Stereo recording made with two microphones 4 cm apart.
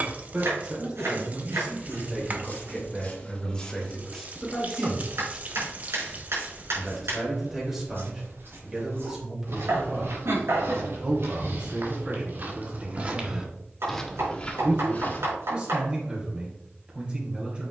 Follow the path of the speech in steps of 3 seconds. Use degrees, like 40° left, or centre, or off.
20° right, 10° left, 10° right, 20° right, 30° right, 30° right.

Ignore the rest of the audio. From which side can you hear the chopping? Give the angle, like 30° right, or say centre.
80° right.